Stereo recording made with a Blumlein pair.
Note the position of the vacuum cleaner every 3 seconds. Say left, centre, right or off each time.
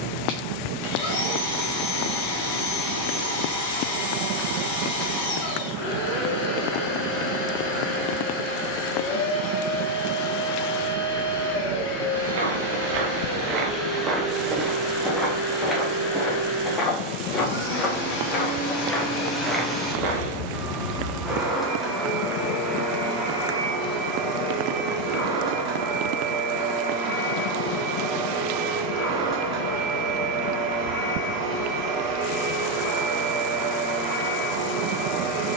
left, left, left, left, left, left, left, centre, right, right, right, right.